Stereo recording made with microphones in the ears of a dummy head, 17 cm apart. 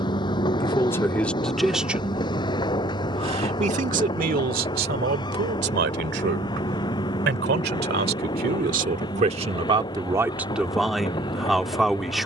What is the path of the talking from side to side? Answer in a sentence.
In this clip you hear the talking go right and come back.